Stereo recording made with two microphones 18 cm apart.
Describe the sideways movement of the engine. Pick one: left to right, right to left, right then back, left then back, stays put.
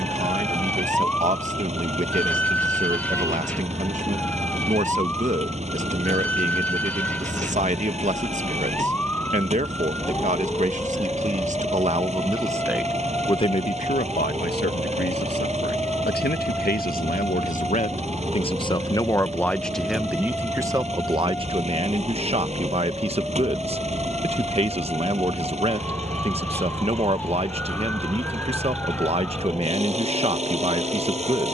stays put.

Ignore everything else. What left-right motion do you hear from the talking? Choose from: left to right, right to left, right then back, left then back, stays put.
left then back.